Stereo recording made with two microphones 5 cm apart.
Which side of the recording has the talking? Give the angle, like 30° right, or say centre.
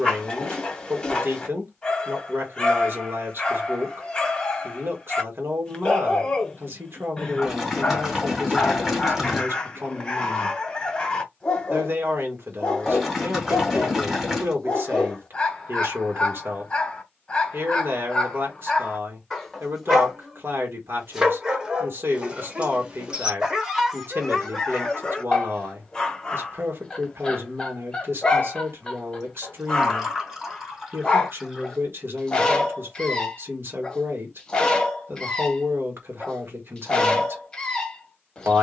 60° right.